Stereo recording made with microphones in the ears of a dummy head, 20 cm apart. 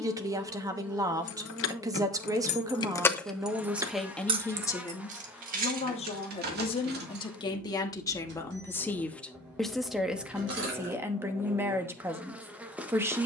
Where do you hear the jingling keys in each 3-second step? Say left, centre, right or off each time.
left, right, right, right, off.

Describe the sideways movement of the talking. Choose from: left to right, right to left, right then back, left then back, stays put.
left then back.